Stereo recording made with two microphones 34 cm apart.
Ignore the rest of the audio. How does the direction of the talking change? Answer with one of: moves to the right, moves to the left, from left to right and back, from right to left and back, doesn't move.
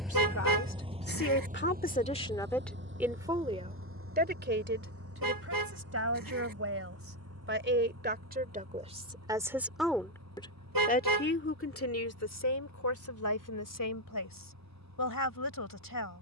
from left to right and back.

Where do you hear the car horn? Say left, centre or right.
right.